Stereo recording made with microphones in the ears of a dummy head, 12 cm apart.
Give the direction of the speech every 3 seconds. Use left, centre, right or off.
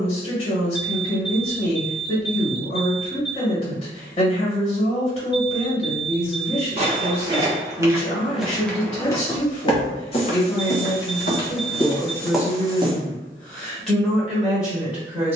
left, left, left, left, centre.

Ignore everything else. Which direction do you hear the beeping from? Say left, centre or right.
left.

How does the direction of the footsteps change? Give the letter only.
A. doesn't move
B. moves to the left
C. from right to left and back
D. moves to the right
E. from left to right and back
C.